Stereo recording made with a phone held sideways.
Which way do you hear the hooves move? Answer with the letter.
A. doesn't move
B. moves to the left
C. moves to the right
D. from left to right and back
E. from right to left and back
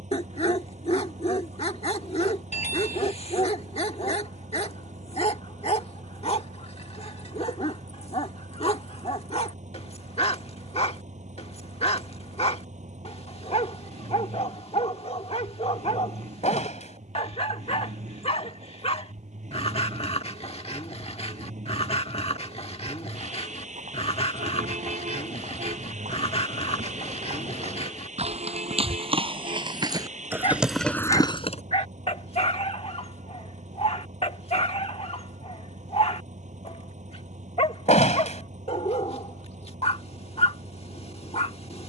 B.